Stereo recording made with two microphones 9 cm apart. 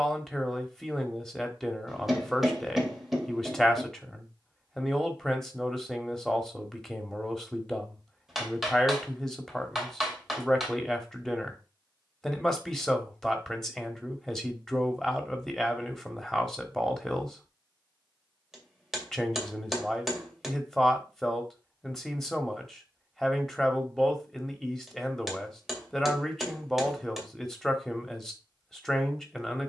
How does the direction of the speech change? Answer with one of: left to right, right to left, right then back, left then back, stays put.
stays put.